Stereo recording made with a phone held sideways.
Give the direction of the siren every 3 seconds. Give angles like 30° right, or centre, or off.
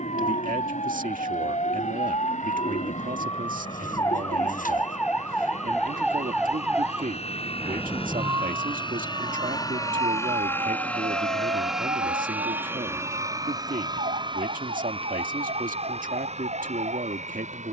40° left, 20° left, 20° right, 40° right, 50° right, 60° right.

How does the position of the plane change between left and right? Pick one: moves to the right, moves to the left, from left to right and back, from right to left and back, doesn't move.
moves to the right.